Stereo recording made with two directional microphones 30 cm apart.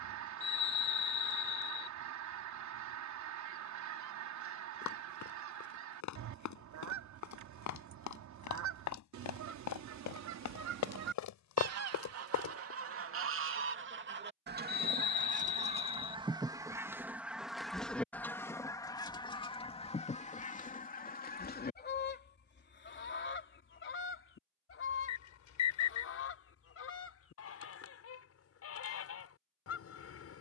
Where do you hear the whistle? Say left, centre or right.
left.